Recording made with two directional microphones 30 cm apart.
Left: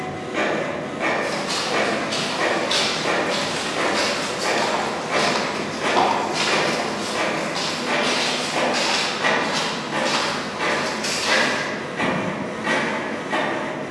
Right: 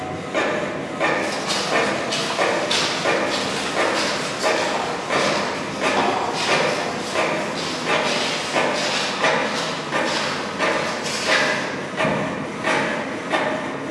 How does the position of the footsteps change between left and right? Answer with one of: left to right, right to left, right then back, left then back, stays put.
right to left.